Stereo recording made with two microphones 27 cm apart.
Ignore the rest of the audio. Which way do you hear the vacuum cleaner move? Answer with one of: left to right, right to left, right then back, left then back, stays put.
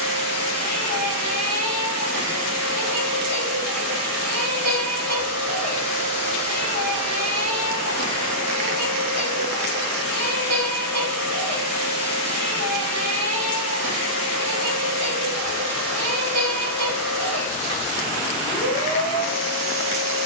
stays put.